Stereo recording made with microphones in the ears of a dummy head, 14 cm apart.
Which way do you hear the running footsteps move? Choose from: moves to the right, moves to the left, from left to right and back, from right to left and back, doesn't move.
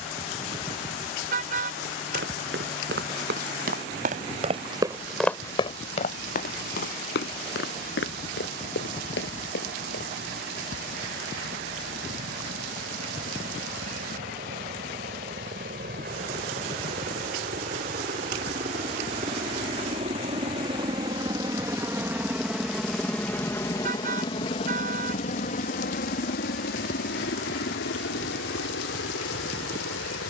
moves to the left.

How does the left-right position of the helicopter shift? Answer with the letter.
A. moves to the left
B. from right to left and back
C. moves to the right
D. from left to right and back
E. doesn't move
A.